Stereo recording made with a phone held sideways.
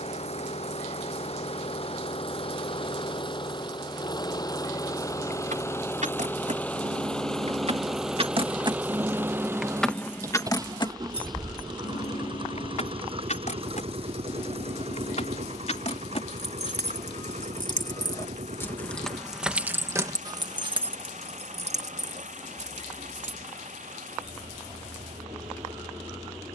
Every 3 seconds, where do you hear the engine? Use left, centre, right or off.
left, left, centre, right, right, right, right, right, right.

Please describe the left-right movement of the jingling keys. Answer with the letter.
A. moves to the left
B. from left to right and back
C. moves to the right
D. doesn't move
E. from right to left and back
E.